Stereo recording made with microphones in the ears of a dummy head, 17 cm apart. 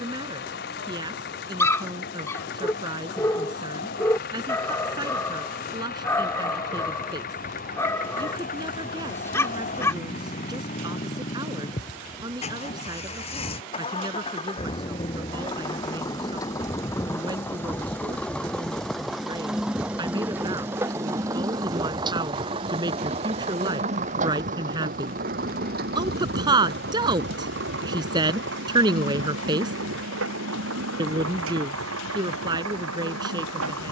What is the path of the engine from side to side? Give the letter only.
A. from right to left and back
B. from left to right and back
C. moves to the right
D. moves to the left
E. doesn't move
C.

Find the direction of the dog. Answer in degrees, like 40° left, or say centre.
10° left.